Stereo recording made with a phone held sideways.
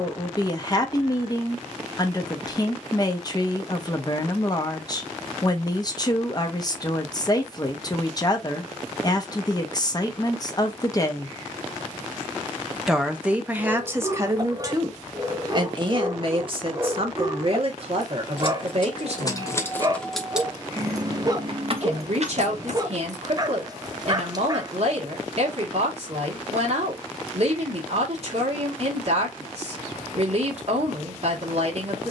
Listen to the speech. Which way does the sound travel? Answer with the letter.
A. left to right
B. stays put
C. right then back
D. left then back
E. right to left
A.